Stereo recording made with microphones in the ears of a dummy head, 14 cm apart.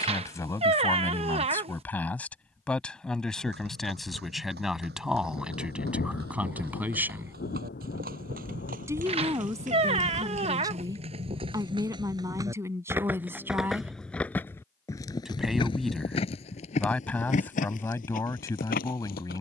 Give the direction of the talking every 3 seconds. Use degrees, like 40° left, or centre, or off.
10° left, centre, 10° right, 20° right, 20° right, 10° left, 20° left.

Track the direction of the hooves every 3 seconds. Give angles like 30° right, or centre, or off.
off, 70° right, 60° right, 40° right, centre, 40° left, 60° left.